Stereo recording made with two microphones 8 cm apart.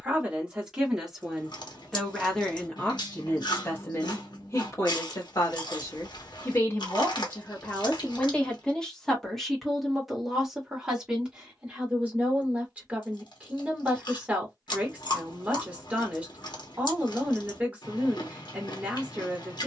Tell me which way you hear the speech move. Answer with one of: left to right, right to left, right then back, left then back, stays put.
left then back.